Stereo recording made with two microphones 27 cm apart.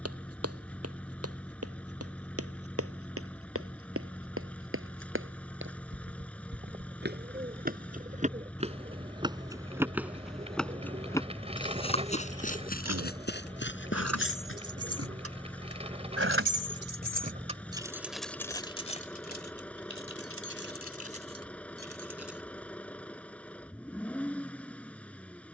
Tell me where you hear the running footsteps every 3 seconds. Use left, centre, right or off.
right, right, right, centre, left, off, off, off, off.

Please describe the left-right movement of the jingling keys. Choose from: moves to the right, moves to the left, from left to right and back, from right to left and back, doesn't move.
moves to the left.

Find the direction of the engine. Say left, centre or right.
centre.